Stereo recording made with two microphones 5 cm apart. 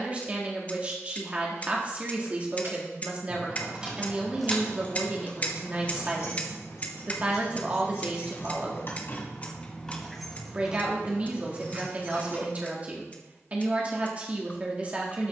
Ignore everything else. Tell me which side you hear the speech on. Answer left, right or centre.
right.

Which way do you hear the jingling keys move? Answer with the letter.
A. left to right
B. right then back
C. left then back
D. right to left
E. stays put
C.